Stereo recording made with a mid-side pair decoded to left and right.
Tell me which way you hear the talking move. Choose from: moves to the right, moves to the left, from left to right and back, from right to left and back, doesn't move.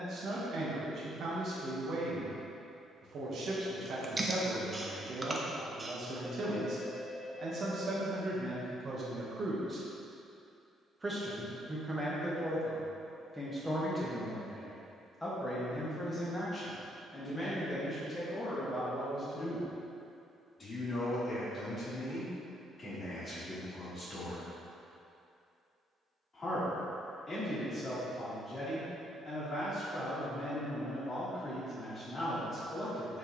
moves to the left.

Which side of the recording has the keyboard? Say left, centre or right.
right.